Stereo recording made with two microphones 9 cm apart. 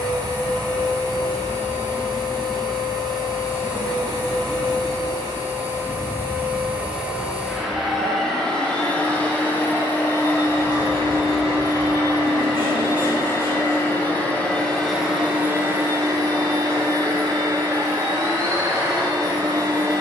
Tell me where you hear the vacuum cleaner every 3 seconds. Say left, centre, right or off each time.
right, right, centre, left, left, right, right.